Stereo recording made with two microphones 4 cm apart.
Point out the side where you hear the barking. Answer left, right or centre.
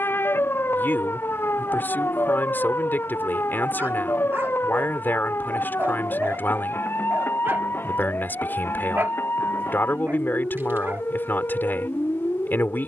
right.